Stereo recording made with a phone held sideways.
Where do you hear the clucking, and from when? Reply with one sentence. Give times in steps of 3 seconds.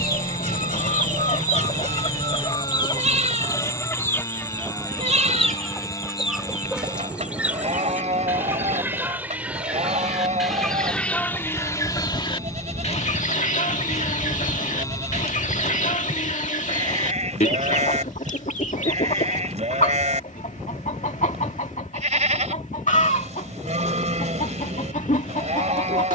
In this clip you hear the clucking on the left from 0 s, in the centre from 3 s and on the left from 12 s.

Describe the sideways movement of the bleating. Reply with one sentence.
In this clip you hear the bleating stay in one place.